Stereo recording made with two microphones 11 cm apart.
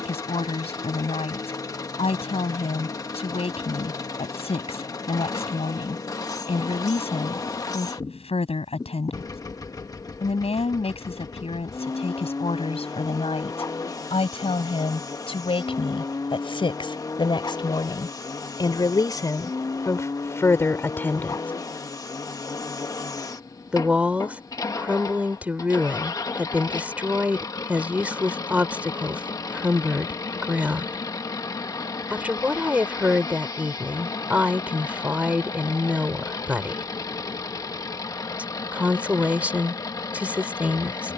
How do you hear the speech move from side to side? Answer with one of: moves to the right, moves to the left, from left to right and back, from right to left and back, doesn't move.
moves to the right.